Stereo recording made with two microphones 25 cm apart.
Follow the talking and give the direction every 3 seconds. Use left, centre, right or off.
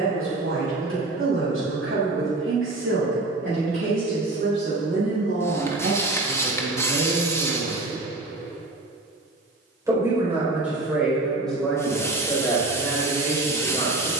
right, right, right, centre, centre.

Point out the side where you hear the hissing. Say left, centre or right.
centre.